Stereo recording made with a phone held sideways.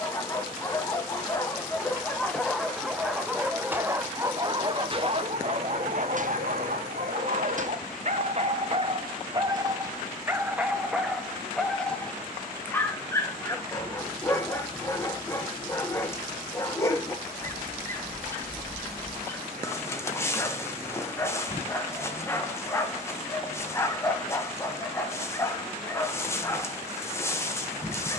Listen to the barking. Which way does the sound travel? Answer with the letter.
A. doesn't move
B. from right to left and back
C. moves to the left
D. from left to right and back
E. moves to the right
D.